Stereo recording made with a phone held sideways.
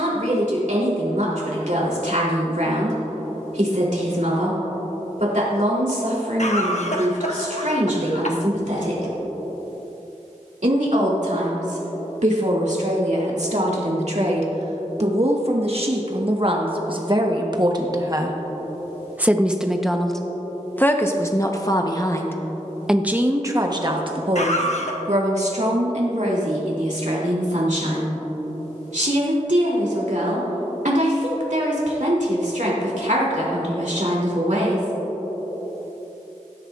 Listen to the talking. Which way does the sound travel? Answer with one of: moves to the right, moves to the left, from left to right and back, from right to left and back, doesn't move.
from right to left and back.